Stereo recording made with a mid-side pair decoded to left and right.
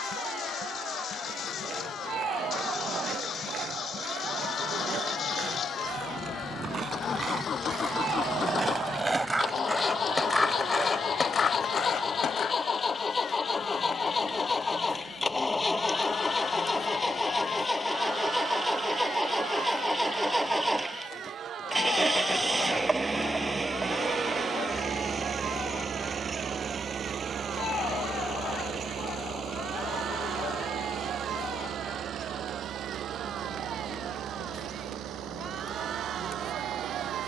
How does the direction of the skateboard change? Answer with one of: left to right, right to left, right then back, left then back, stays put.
right to left.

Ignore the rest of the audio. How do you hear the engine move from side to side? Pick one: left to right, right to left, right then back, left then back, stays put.
left to right.